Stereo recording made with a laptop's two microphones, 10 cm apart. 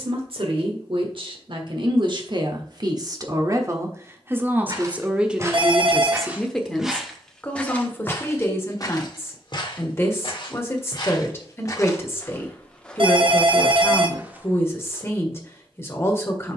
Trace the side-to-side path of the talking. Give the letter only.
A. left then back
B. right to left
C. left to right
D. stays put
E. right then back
B.